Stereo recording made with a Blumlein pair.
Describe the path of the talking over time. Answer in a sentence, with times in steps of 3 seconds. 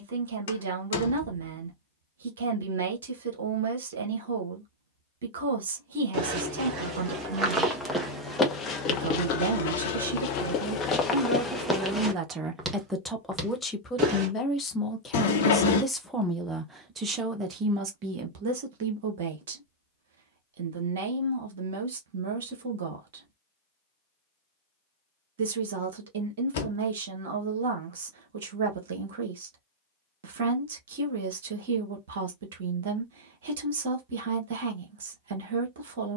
You can hear the talking on the right from 0 s, in the centre from 12 s and on the right from 18 s.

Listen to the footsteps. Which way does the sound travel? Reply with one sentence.
In this clip you hear the footsteps move from right to left and back again.